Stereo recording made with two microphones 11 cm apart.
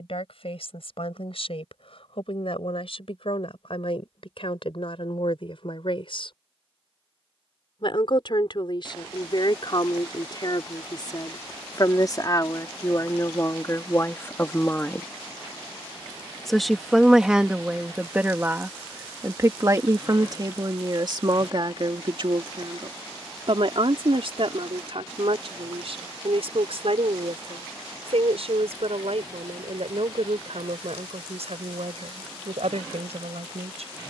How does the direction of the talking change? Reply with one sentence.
You can hear the talking move to the right.